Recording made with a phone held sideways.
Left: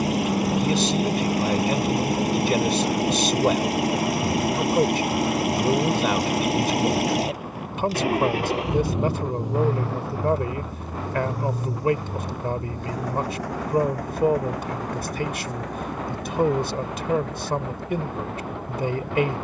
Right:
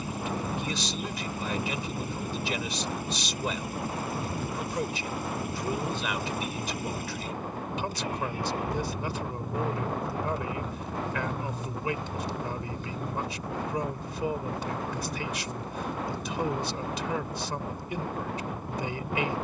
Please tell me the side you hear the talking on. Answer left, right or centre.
left.